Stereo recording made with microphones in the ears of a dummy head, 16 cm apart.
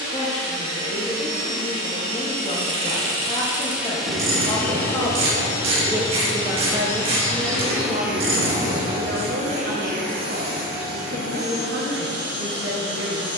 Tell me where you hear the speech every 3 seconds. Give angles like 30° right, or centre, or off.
30° left, 20° left, 30° right, 70° right, 70° right.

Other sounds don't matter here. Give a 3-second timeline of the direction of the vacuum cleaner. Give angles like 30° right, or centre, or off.
50° right, 10° left, centre, 50° right, 60° right.